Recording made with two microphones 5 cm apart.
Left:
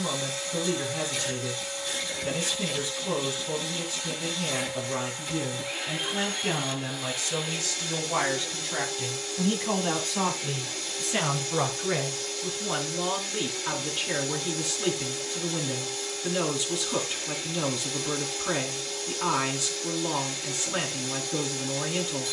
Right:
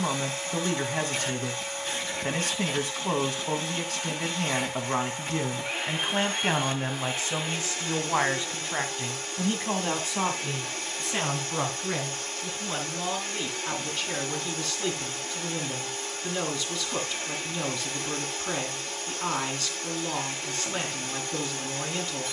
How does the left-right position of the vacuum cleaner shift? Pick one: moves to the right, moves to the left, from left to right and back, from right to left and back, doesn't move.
doesn't move.